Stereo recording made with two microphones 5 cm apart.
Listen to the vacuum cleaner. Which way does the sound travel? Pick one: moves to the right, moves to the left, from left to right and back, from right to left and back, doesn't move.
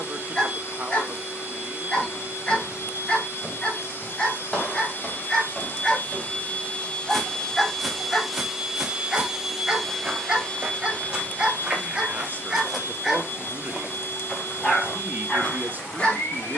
from left to right and back.